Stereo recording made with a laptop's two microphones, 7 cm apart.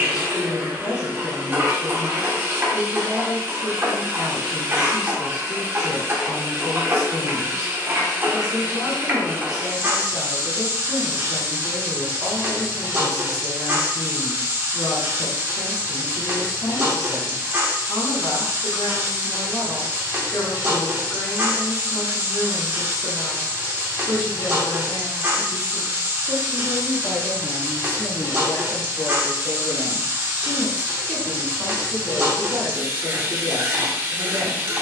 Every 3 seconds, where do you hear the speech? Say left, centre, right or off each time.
left, left, left, left, left, left, left, left, left, left, centre, right.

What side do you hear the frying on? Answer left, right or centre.
right.